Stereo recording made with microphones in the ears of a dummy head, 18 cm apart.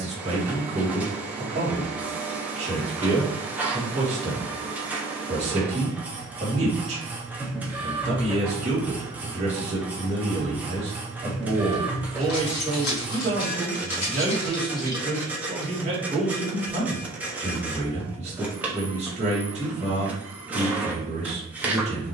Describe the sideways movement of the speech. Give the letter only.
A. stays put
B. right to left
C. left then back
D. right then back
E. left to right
A.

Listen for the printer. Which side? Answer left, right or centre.
centre.